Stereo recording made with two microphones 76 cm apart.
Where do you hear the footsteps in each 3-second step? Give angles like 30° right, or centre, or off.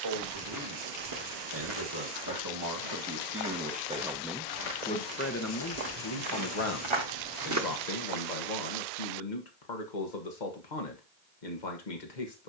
60° right, 70° right, 40° right, off.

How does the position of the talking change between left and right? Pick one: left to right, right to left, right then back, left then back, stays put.
right to left.